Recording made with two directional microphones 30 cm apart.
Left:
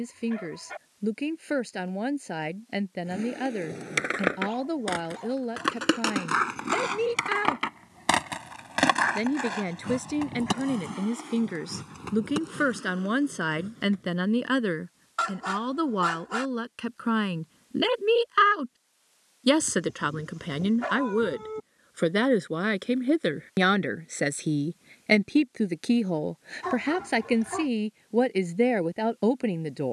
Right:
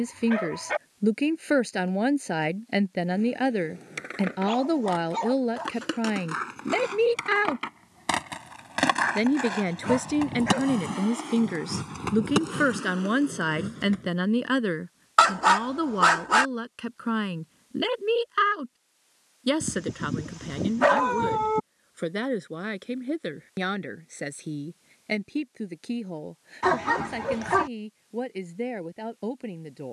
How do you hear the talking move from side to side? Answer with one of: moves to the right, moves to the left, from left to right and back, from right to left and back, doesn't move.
moves to the left.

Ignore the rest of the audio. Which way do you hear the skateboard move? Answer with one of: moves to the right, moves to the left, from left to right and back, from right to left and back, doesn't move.
moves to the right.